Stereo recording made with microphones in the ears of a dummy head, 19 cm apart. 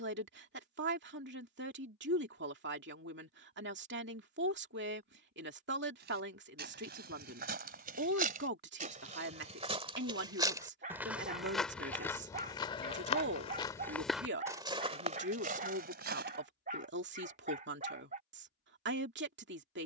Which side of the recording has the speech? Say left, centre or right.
right.